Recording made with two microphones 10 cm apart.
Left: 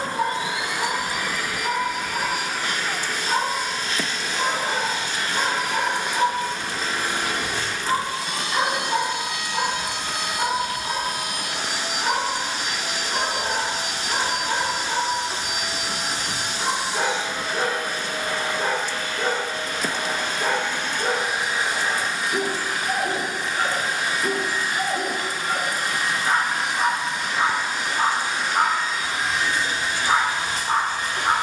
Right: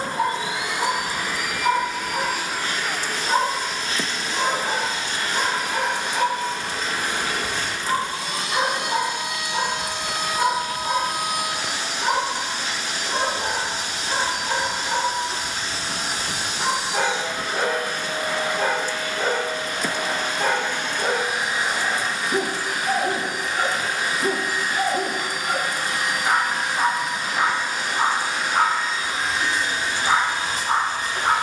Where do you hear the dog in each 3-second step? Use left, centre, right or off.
right, right, centre, right, right, right, right, right, right, right, right.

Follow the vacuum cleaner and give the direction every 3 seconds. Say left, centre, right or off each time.
right, right, right, centre, left, centre, right, right, right, right, right.